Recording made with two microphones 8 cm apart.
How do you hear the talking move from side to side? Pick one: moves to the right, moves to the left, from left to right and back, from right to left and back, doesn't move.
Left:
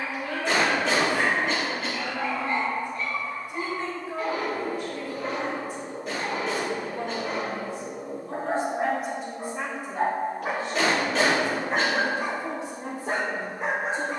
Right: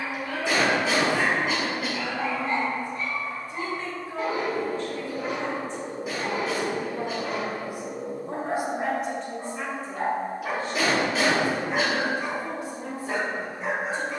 from left to right and back.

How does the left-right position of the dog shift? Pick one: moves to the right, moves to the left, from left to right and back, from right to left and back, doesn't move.
moves to the left.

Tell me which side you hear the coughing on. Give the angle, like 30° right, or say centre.
10° right.